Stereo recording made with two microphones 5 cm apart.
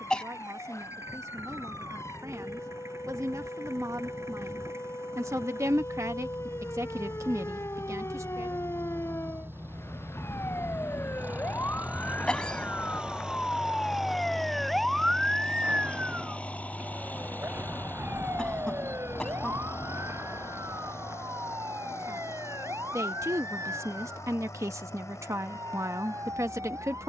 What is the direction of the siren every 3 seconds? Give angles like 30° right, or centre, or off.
80° left, 70° left, 70° left, 50° left, 20° left, 30° right, 60° right, 70° right, 80° right.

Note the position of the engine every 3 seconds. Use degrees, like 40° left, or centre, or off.
70° right, 60° right, 50° right, 40° right, 10° right, 30° left, 50° left, 70° left, 70° left.